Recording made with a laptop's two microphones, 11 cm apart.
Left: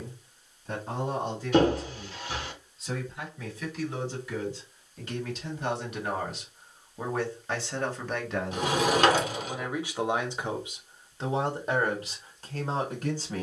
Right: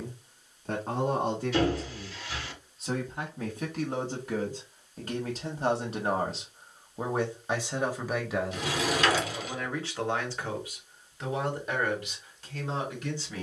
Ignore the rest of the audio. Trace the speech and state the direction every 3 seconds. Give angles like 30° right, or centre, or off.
60° right, 40° right, 20° right, 20° left, 40° left.